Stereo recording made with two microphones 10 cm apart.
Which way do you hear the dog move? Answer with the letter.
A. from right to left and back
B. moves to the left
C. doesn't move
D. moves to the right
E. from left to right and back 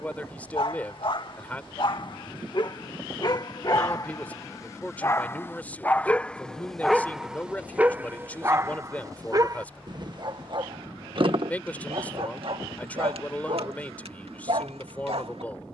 D.